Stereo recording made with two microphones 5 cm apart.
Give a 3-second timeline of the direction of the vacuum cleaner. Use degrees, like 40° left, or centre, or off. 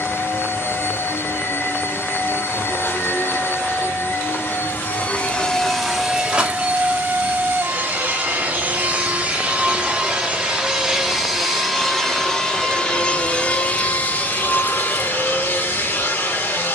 50° left, 40° left, 30° right, 10° right, 20° left, 40° left.